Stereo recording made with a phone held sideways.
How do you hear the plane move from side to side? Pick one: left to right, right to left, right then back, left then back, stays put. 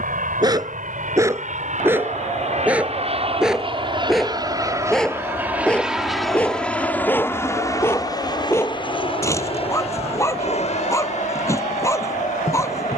right to left.